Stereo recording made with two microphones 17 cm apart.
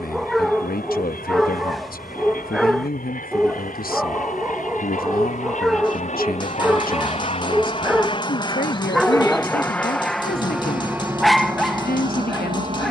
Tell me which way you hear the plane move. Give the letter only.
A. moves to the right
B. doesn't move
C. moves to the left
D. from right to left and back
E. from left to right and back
A.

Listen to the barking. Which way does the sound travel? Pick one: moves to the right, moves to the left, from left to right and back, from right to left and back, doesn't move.
doesn't move.